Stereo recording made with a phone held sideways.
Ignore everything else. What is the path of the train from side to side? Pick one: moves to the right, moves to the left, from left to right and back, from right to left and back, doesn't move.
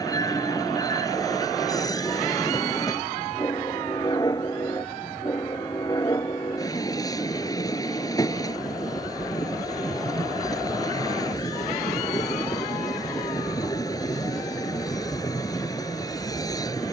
doesn't move.